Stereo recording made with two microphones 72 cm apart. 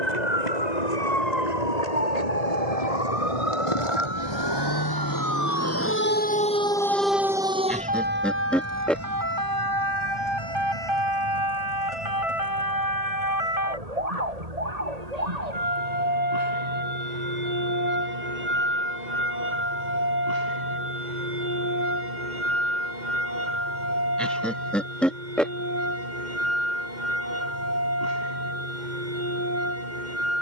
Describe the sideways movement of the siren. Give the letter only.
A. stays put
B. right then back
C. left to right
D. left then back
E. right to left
C.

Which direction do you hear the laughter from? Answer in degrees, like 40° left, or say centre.
centre.